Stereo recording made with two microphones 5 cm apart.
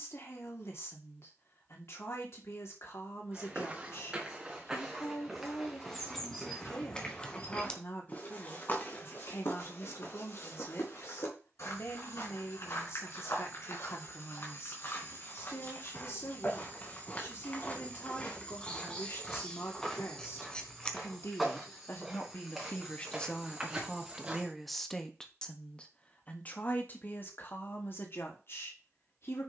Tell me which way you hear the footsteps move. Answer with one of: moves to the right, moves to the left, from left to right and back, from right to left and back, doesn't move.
from right to left and back.